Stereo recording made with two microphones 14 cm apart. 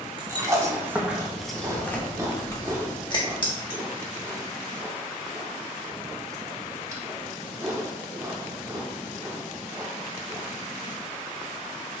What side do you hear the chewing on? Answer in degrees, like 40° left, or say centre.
20° right.